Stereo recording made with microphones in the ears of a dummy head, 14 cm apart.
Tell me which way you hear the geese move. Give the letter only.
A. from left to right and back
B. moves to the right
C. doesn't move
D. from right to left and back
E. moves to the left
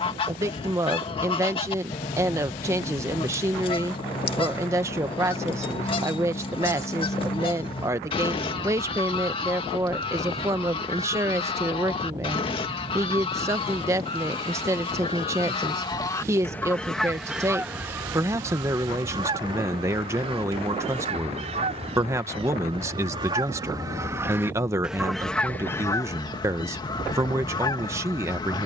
A.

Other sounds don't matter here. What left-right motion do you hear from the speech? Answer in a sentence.
You can hear the speech stay in one place.